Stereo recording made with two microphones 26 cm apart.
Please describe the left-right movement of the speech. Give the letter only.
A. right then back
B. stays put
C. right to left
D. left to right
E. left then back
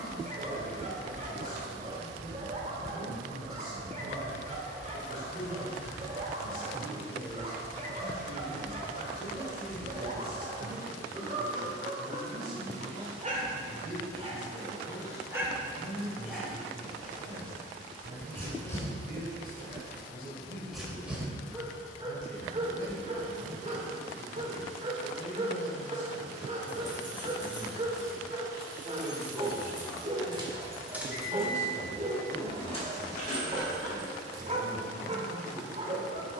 C.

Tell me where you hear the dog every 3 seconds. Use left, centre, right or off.
right, right, right, right, right, centre, centre, right, right, right, right, right.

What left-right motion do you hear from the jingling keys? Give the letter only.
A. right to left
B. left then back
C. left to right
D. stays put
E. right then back
A.